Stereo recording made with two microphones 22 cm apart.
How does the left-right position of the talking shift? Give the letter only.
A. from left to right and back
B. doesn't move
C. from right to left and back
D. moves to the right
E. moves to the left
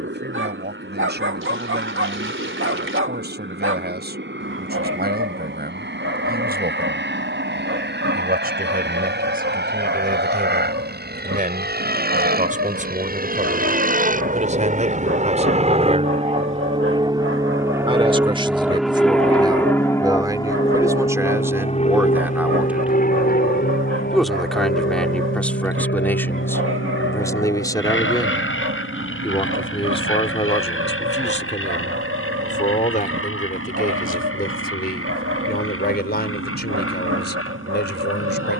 E.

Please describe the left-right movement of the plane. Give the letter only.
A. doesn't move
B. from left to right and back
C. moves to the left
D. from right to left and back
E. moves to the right
C.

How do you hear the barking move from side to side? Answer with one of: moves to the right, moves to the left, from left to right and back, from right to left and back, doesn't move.
doesn't move.